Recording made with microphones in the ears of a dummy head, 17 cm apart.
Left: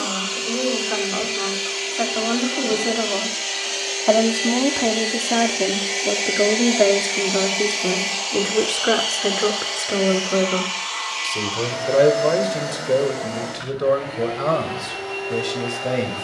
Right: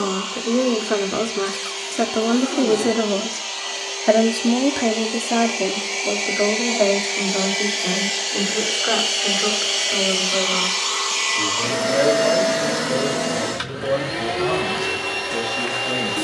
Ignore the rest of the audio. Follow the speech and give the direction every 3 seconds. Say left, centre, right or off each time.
right, centre, left, left, left, left.